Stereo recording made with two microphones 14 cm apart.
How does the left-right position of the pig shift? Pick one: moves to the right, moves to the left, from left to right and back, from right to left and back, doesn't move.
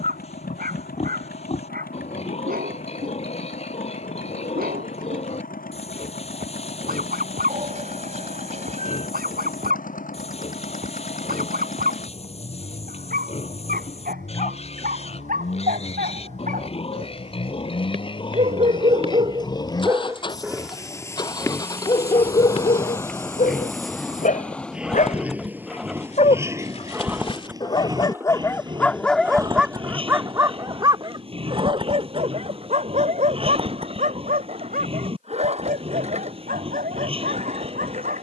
moves to the right.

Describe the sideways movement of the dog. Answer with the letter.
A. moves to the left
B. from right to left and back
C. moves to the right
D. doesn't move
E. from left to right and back
B.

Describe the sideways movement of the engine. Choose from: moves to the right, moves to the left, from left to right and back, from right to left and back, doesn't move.
moves to the right.